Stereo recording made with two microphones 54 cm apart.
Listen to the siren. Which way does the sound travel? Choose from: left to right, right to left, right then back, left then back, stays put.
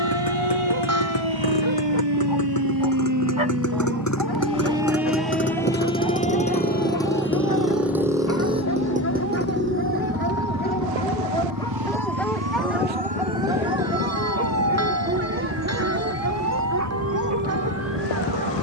right to left.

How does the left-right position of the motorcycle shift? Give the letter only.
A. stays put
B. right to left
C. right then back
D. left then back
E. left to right
E.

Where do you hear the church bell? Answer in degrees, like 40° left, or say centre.
30° right.